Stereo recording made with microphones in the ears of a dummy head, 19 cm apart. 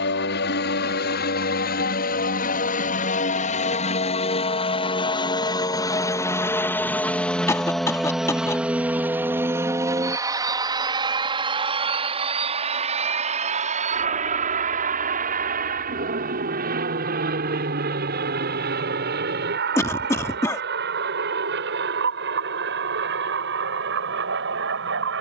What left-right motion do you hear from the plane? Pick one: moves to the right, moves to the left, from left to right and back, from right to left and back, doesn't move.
moves to the right.